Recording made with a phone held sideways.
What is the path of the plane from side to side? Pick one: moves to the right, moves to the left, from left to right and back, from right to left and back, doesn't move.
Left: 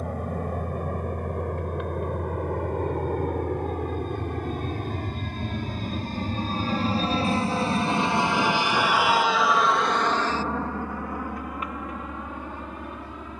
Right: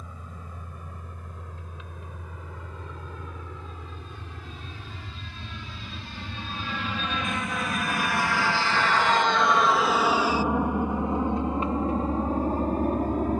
moves to the right.